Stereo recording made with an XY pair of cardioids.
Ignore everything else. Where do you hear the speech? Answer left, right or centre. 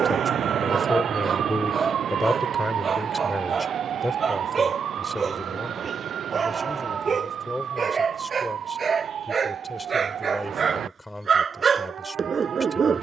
centre.